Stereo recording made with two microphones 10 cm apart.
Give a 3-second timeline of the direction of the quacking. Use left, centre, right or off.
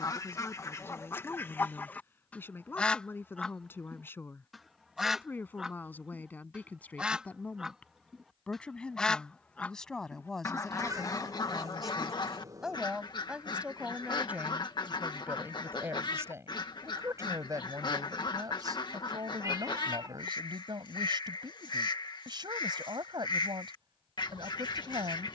left, centre, centre, left, left, left, left, left, left.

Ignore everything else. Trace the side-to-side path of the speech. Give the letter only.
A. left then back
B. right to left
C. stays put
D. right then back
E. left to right
E.